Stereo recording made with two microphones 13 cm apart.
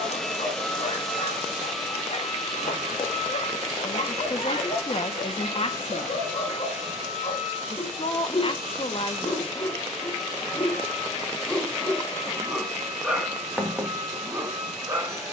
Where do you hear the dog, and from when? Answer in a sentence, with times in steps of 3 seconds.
In this clip you hear the dog on the left from 0 s and in the centre from 12 s.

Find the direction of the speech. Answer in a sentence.
You can hear the speech on the left.